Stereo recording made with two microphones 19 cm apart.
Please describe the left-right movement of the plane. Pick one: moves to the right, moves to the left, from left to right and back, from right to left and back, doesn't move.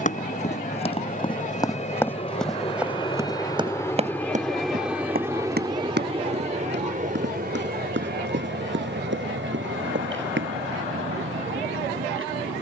moves to the right.